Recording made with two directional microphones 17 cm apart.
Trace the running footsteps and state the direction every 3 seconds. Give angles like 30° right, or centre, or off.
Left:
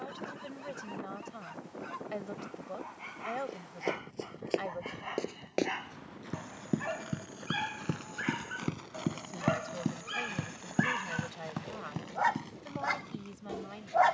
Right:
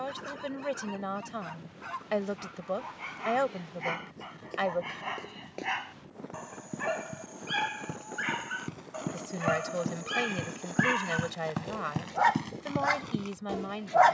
off, 60° left, 50° left, centre, 40° right.